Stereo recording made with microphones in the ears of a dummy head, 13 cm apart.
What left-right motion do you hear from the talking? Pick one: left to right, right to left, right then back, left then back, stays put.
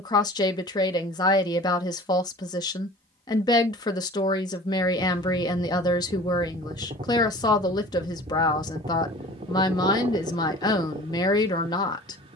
stays put.